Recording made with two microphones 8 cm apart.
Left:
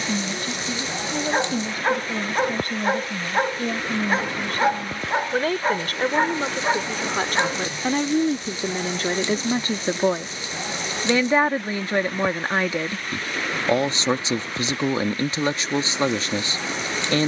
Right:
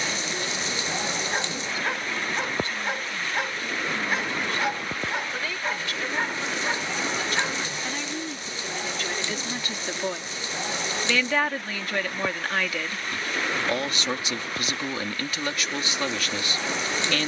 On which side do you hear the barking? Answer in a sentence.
You can hear the barking on the left.